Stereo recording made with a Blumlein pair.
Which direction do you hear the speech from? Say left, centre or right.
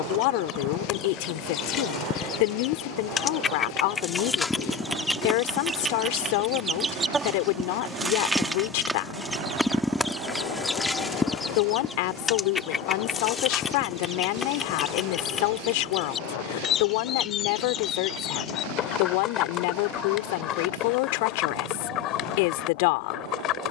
left.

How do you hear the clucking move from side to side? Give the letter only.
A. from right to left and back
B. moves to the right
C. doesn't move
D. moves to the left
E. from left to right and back
E.